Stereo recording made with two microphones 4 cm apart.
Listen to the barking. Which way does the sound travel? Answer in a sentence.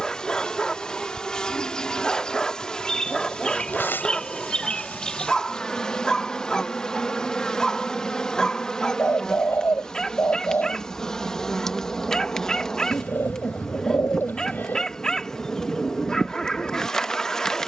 In this clip you hear the barking stay put.